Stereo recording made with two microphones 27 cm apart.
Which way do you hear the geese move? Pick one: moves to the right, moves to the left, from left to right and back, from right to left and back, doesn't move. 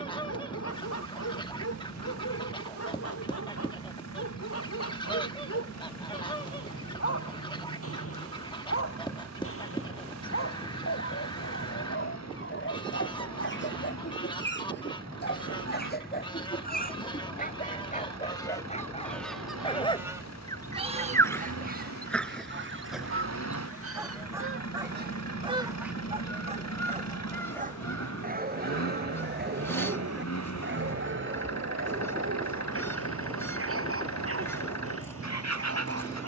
from left to right and back.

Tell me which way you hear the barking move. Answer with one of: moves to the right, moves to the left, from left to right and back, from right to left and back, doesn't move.
moves to the right.